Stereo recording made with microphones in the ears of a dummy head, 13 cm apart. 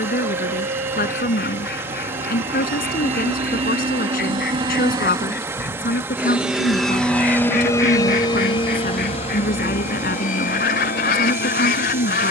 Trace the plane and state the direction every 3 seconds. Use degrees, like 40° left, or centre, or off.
60° right, 30° right, 10° left, 50° left.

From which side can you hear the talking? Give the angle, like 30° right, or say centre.
70° left.